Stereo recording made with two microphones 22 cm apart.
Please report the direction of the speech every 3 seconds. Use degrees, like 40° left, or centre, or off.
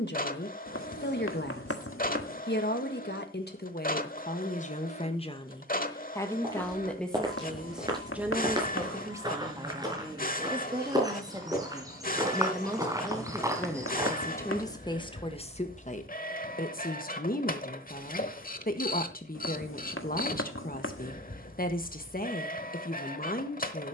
50° left, 40° left, centre, 20° right, centre, 40° left, 40° left, 40° left.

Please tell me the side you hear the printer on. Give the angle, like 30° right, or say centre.
40° left.